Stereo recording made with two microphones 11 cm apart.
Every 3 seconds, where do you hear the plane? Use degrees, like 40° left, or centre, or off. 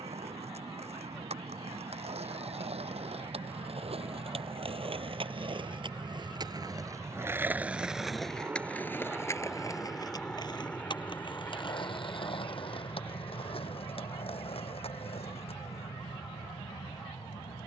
60° right, 50° right, 30° right, 10° left, 40° left, 60° left.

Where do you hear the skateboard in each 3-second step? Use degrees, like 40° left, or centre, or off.
80° right, 60° right, 20° right, 40° left, 60° left, 70° left.